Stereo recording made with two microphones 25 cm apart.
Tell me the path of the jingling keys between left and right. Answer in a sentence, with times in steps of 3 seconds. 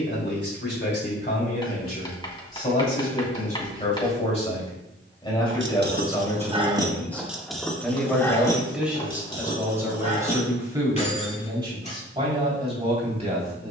In this clip you hear the jingling keys not at all from 0 s, on the right from 3 s, in the centre from 6 s, on the left from 9 s and not at all from 12 s.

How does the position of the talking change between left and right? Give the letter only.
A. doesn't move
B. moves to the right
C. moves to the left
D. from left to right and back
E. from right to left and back
B.